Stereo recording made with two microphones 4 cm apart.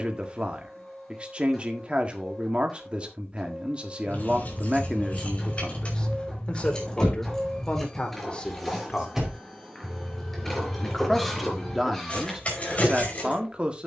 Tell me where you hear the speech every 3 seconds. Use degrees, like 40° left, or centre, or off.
30° right, 10° right, 30° left, centre, 20° right.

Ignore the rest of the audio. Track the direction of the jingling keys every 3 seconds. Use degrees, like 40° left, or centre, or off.
off, 40° left, 10° left, 10° left, 40° left.